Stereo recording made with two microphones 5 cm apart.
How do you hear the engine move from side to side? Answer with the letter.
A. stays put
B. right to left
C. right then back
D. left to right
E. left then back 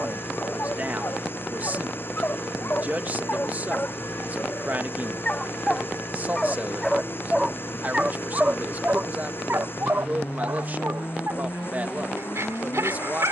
A.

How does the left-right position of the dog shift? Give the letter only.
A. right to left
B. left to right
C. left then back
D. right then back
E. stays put
B.